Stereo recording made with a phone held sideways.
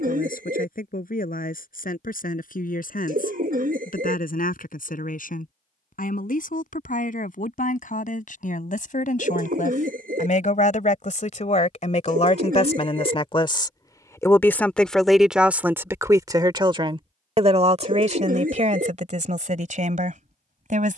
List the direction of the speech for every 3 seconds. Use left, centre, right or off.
left, left, left, left, left, right, right.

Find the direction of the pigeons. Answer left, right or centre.
right.